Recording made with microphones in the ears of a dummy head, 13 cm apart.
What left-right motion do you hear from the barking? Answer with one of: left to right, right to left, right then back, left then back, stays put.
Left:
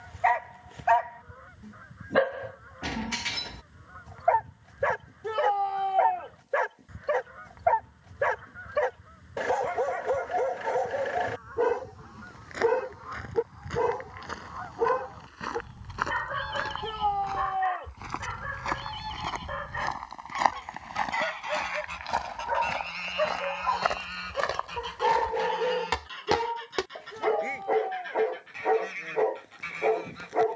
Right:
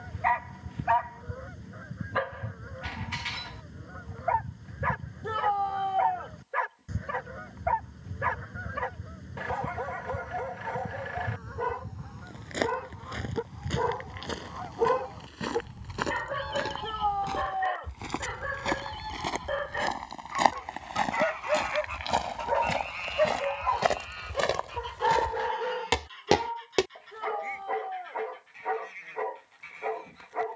right then back.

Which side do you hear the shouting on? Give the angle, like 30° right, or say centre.
20° left.